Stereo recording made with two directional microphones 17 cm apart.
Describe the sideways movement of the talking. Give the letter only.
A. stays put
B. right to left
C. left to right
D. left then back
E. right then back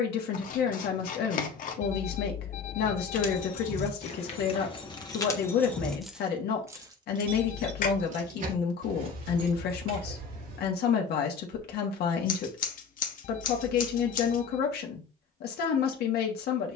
A.